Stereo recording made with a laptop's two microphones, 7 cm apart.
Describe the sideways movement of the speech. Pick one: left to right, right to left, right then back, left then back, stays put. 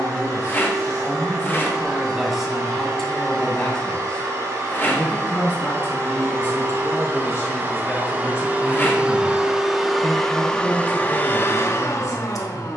right to left.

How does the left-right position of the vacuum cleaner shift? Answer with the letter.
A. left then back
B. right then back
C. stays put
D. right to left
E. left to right
D.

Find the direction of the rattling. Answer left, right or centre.
left.